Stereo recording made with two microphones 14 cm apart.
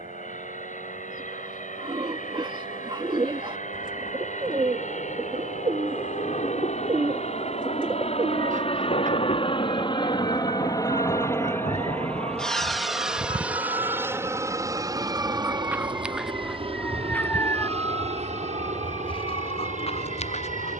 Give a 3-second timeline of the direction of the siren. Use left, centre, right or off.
right, right, right, right, right, centre, left.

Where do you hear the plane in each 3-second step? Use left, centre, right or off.
left, left, left, left, centre, right, right.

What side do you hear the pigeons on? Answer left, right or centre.
right.